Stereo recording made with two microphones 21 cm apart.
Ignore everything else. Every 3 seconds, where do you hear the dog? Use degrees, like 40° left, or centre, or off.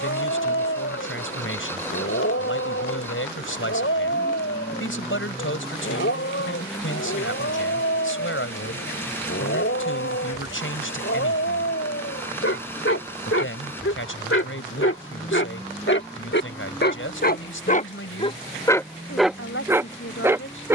80° left, 80° left, 80° left, 80° left, 70° left, 50° left, centre.